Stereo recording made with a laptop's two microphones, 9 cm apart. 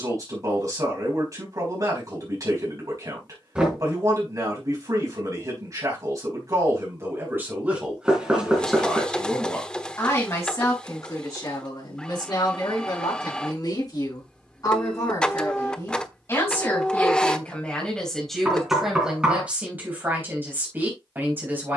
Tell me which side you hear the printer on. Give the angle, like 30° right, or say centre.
10° left.